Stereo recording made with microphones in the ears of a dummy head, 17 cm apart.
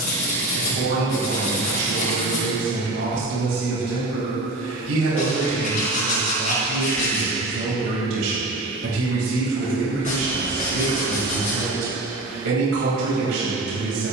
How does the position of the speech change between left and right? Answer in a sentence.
You can hear the speech stay in one place.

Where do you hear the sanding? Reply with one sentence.
You can hear the sanding on the left.